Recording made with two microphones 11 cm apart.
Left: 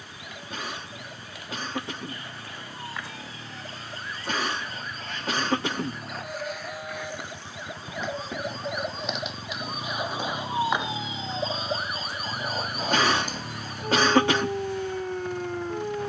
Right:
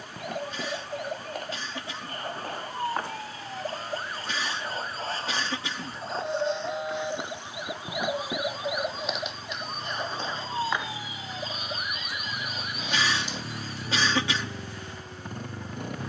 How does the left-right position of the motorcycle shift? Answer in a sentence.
You can hear the motorcycle go from the left side to the right.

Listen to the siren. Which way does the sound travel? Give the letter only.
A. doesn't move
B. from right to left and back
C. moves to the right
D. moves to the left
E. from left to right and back
D.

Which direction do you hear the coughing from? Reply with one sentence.
In this clip you hear the coughing on the left.